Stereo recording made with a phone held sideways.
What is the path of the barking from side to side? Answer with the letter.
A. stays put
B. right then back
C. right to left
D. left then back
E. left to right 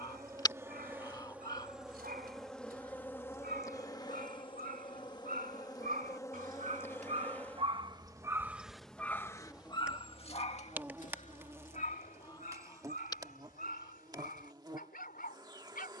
C.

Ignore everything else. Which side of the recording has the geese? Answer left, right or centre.
left.